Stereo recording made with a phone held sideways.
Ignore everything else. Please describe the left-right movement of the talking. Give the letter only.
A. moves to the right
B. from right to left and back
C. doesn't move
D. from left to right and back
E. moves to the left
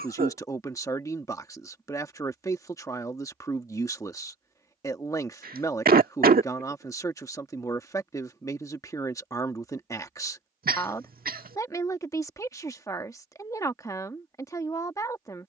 C.